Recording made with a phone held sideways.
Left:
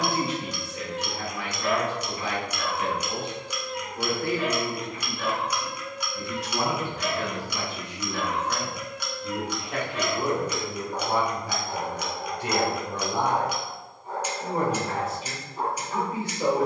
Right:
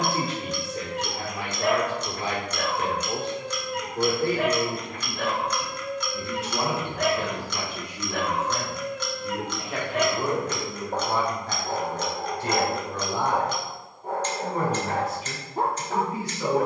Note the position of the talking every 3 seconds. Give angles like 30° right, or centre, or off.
40° right, 40° right, 20° right, 10° left, 20° left, 30° left.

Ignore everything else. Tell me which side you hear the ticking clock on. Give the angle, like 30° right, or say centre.
10° left.